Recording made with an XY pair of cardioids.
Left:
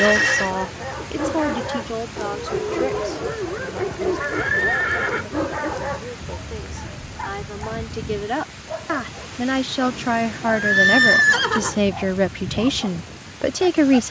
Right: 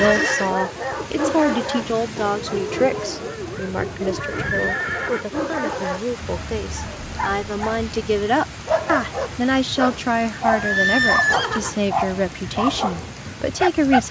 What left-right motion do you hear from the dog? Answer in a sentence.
You can hear the dog move from right to left and back again.